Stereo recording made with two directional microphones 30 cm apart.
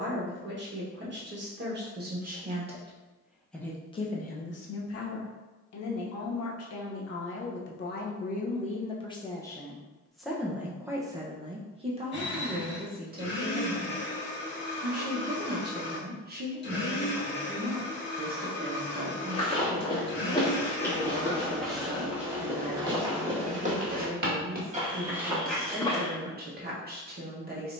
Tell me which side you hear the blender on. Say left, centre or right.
left.